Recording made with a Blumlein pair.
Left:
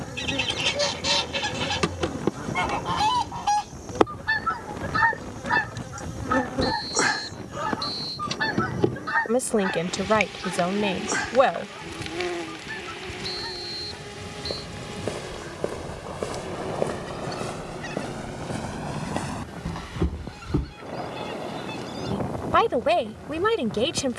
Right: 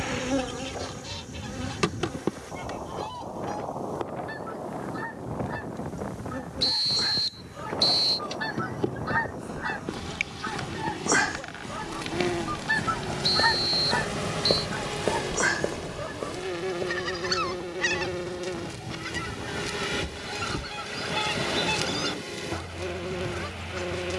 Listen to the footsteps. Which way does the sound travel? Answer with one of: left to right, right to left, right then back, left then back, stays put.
right to left.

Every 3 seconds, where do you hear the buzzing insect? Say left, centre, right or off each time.
centre, left, left, centre, centre, right, right, right.